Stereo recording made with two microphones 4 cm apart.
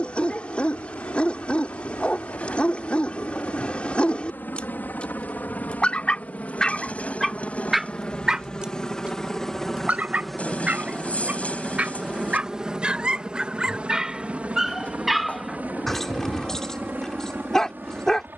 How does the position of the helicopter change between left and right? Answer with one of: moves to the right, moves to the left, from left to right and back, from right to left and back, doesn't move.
moves to the right.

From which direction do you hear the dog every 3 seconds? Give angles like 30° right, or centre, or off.
30° left, 30° left, 10° left, 30° right, 20° right, 10° left.